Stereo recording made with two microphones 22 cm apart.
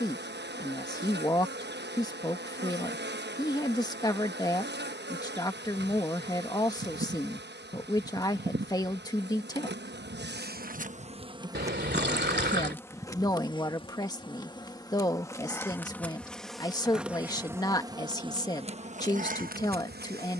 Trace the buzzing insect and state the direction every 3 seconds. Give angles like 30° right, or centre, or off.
50° right, 50° right, 50° right, 40° right, 20° left, centre, 40° right.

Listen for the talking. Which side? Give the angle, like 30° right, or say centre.
20° left.